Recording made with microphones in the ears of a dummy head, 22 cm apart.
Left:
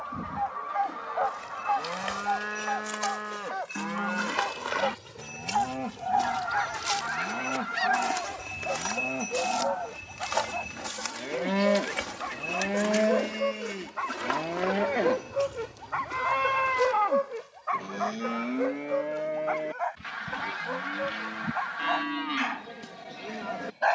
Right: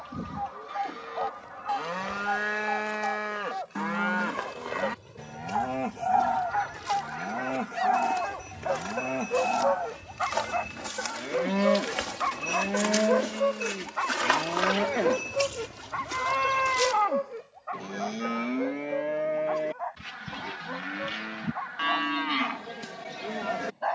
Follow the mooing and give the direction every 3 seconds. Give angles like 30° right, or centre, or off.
30° right, 30° right, 30° right, centre, 20° left, centre, 10° right, 20° right.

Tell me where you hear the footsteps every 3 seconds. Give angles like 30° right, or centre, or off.
60° left, 50° left, 40° left, 10° left, 30° right, 50° right, off, off.